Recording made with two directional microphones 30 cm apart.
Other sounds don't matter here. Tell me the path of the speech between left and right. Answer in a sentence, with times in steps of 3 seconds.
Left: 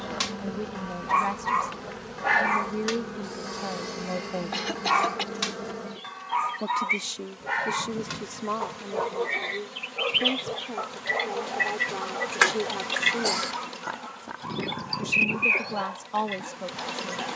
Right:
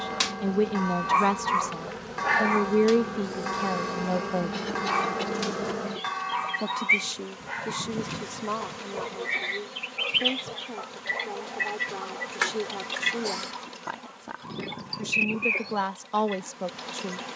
You can hear the speech on the right from 0 s, in the centre from 6 s and on the right from 15 s.